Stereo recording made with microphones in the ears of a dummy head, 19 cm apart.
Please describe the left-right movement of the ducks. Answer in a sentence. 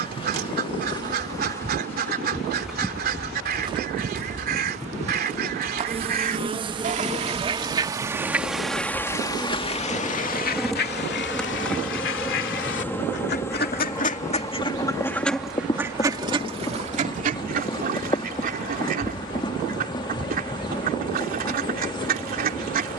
You can hear the ducks move from right to left and back again.